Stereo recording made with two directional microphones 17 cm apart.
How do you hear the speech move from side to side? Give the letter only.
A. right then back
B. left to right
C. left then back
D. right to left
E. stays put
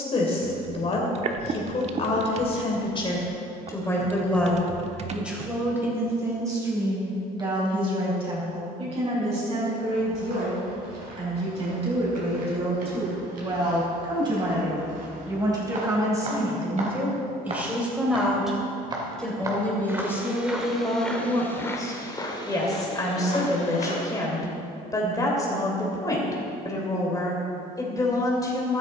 A.